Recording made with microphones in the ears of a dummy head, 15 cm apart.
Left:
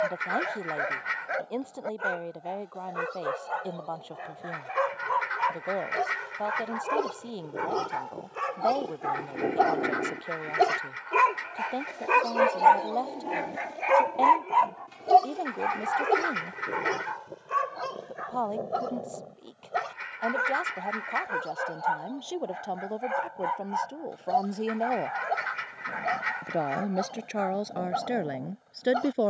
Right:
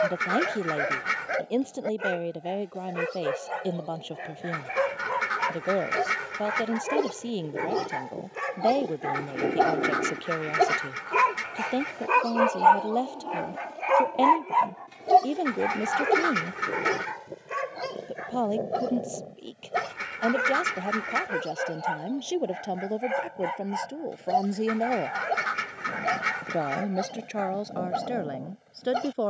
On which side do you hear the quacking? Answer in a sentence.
In this clip you hear the quacking on the right.